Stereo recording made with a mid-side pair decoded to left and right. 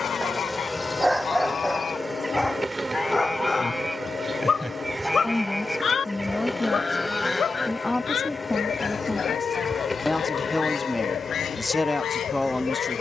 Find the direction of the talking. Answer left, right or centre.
centre.